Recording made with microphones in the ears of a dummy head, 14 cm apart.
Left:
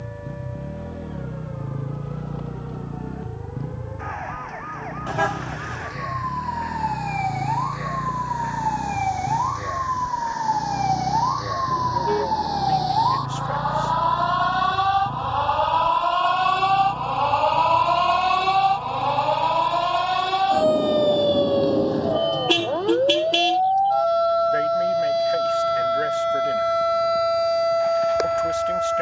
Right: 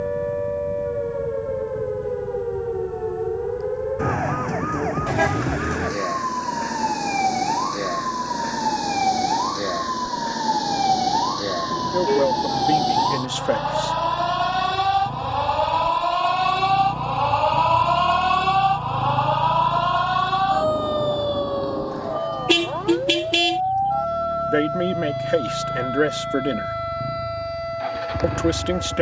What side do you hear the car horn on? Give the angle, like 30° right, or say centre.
10° right.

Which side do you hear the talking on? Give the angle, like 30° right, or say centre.
70° right.